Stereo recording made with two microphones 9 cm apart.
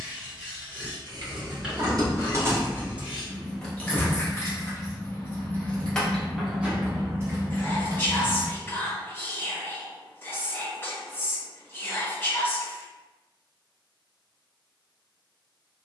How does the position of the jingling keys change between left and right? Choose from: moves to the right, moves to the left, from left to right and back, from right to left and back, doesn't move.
from right to left and back.